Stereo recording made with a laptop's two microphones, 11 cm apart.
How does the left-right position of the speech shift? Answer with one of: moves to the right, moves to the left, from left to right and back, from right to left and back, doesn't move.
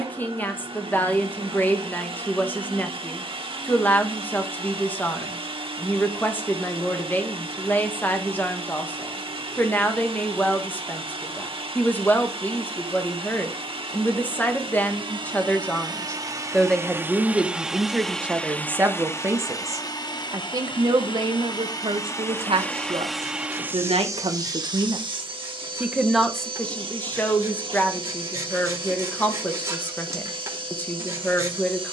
from left to right and back.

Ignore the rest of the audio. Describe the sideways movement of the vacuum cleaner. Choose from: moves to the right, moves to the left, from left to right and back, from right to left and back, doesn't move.
from right to left and back.